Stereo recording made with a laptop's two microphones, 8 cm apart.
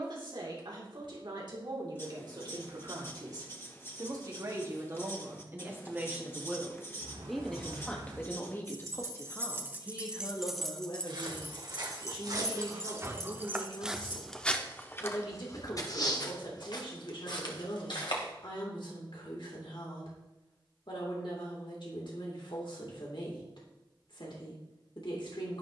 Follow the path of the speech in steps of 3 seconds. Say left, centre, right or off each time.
right, right, centre, left, left, left, left, left, left.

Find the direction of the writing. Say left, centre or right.
left.